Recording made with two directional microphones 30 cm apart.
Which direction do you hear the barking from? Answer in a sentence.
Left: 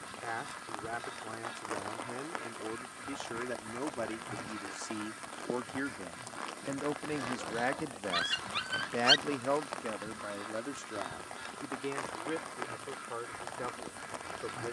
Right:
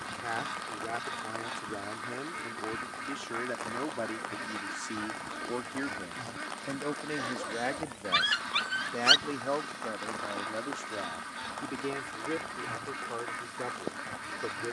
In this clip you hear the barking on the right.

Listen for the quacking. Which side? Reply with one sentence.
In this clip you hear the quacking on the right.